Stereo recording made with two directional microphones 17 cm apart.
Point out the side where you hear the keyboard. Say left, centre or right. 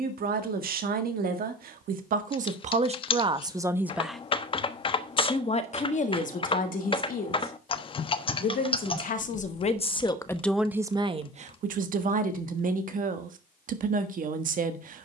left.